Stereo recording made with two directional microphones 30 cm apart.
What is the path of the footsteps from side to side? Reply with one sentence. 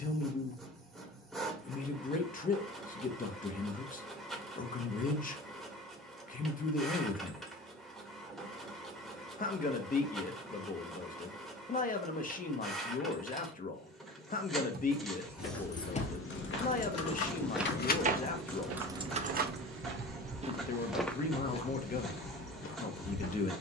In this clip you hear the footsteps move from left to right and back again.